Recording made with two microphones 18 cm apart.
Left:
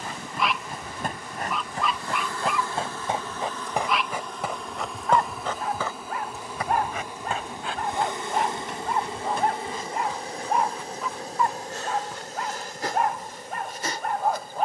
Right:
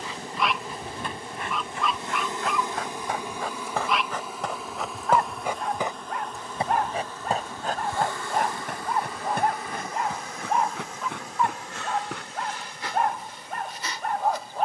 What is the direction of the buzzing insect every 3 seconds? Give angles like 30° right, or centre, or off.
20° right, centre, 20° left, 30° left, 40° left.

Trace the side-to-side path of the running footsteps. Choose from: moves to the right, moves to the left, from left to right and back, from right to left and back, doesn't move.
moves to the right.